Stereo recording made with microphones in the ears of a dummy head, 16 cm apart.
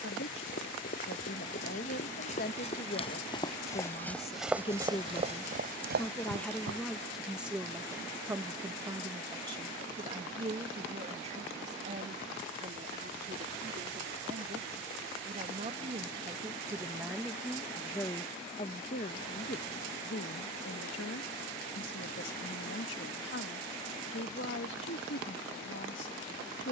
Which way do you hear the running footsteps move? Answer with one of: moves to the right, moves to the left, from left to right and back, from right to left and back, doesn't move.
moves to the right.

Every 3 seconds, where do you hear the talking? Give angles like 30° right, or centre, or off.
60° left, 30° left, centre, 30° right, 40° right, 10° right, 50° left, 70° left, 70° left.